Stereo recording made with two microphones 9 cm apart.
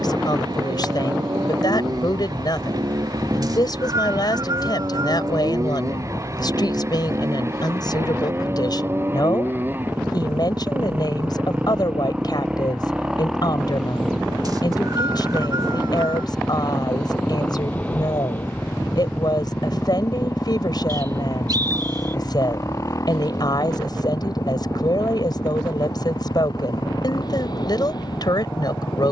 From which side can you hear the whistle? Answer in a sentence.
You can hear the whistle on the right.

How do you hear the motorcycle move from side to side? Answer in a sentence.
You can hear the motorcycle move from right to left.